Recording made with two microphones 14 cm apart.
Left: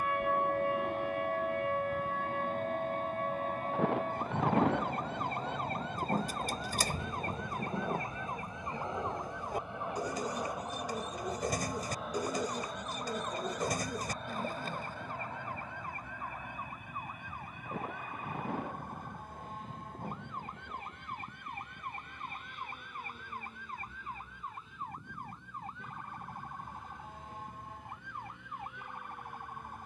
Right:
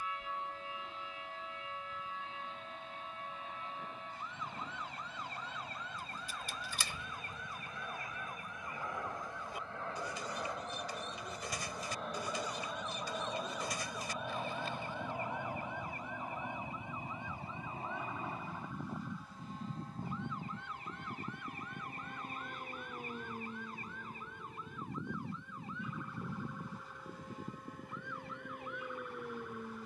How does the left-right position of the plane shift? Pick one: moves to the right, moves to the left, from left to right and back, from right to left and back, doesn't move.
moves to the right.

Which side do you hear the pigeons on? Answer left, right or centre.
left.